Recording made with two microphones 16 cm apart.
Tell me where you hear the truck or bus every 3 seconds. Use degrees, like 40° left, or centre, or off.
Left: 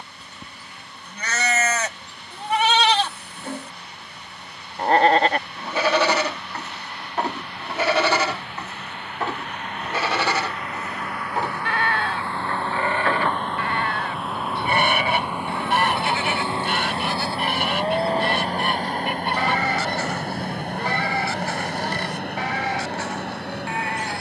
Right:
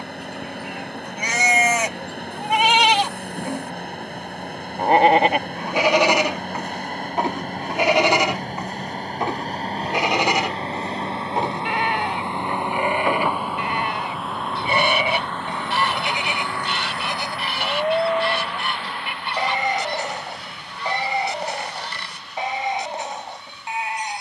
60° right, 50° right, 50° right, 30° right, 10° right, 20° left, 40° left, 60° left.